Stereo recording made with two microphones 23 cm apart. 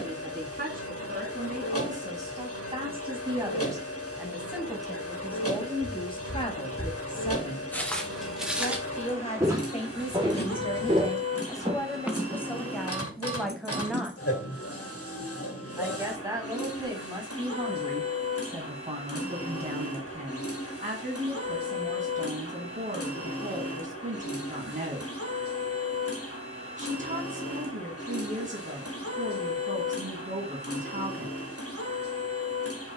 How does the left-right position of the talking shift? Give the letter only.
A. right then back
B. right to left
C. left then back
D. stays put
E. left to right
C.